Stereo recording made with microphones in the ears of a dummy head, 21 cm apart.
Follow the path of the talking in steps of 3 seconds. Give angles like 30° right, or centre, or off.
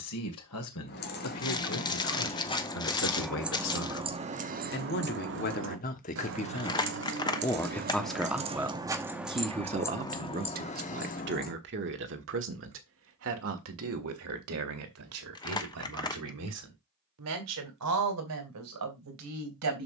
60° left, 50° left, 10° left, 40° right, 60° right, 70° right, 70° right.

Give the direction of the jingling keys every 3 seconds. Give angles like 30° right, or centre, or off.
30° left, 30° right, 40° right, 20° left, off, off, off.